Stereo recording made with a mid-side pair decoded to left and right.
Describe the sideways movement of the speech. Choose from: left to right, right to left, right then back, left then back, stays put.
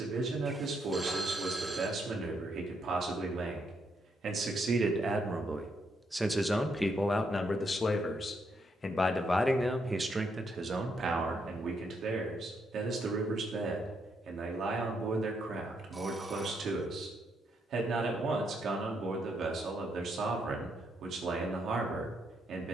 left then back.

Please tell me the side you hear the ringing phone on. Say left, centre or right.
right.